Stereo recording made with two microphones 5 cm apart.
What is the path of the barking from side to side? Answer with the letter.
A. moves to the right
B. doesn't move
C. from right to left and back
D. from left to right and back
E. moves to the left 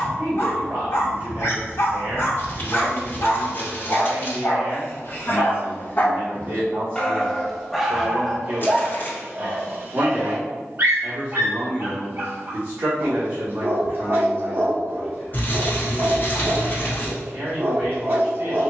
A.